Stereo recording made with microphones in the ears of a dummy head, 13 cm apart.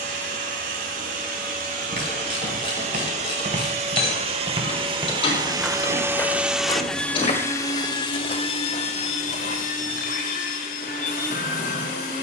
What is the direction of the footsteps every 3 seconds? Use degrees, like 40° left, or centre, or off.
60° right, 30° right, 50° left, 70° left.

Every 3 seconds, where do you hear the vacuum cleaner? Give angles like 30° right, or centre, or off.
60° right, 40° right, 20° left, 60° left.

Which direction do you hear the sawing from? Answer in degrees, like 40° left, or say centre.
60° left.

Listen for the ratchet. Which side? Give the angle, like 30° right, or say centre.
40° left.